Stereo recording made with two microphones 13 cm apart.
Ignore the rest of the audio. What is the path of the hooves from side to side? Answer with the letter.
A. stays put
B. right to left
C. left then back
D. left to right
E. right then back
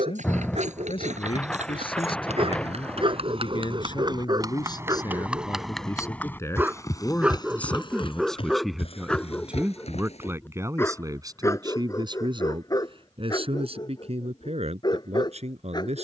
B.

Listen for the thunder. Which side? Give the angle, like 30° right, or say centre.
10° left.